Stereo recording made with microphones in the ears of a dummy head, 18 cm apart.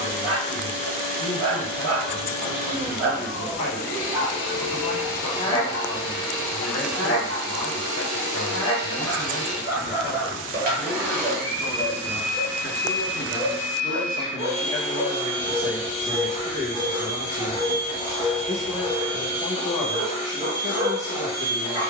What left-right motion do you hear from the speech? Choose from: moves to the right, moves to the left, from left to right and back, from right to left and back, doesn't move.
moves to the right.